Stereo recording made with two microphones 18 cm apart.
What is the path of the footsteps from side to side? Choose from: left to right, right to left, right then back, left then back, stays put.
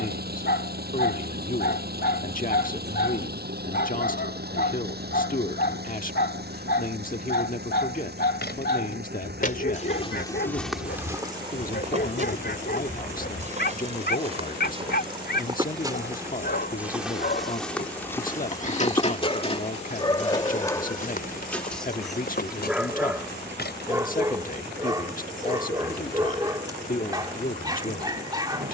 right then back.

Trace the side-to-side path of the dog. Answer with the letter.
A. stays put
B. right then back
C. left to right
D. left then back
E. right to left
C.